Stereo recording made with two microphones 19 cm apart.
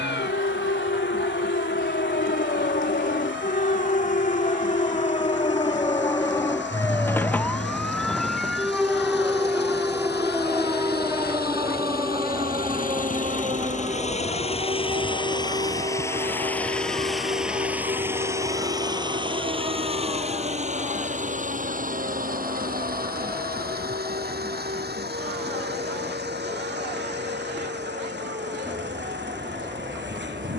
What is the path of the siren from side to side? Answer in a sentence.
You can hear the siren move to the right.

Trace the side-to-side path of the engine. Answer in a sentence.
You can hear the engine travel towards the right.